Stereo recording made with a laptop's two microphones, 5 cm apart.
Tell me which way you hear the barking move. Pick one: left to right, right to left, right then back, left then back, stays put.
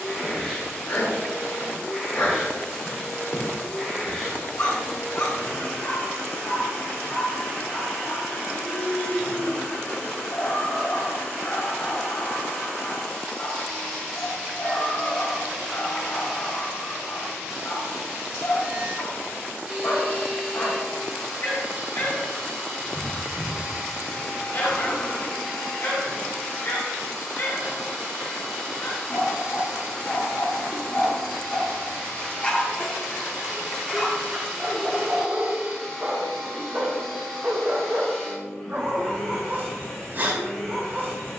left to right.